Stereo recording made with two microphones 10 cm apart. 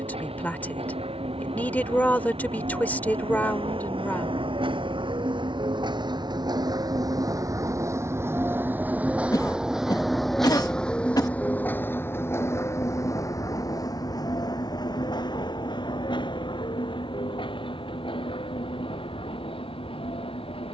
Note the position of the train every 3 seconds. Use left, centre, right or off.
right, right, right, centre, left, left, left.